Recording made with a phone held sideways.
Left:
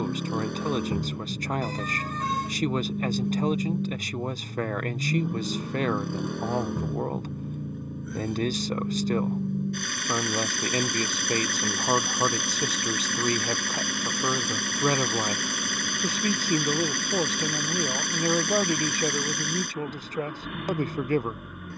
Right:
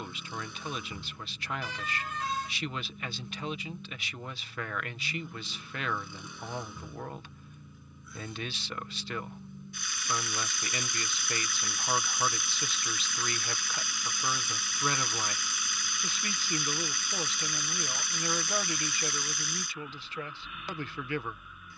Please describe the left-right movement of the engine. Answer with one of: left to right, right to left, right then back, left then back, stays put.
stays put.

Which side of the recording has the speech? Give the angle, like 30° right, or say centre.
40° left.